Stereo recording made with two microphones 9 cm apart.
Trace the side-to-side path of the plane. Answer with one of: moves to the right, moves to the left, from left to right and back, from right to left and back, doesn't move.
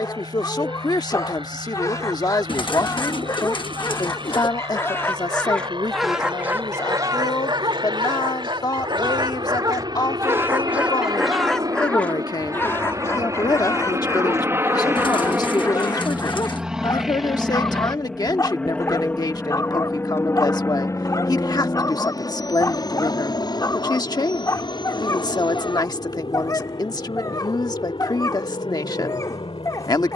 moves to the left.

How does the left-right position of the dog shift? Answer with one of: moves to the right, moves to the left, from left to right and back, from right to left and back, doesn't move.
from left to right and back.